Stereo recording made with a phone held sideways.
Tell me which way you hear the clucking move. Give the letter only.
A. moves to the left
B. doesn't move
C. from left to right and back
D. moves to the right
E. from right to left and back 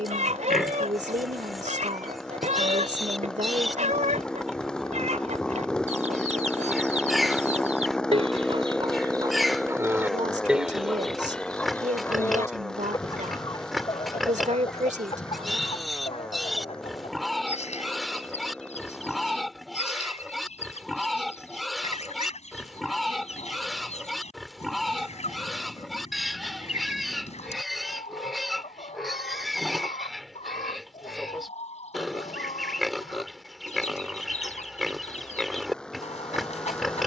A.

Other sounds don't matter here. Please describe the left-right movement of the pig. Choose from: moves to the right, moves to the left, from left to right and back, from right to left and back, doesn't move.
doesn't move.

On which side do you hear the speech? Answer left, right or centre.
right.